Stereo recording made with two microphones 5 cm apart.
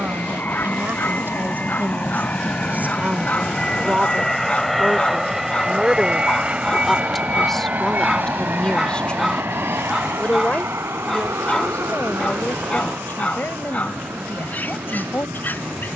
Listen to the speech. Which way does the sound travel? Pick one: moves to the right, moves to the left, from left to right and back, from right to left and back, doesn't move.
moves to the left.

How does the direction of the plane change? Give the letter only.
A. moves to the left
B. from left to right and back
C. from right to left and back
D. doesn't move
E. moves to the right
E.